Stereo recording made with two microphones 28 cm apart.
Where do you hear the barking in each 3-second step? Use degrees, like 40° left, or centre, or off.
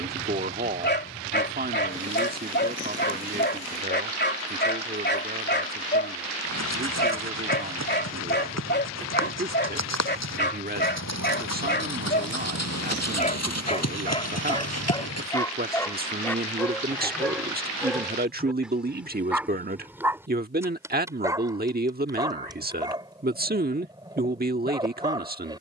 40° left, 40° left, 40° left, 40° left, 20° left, 10° left, centre, 10° right, 10° right.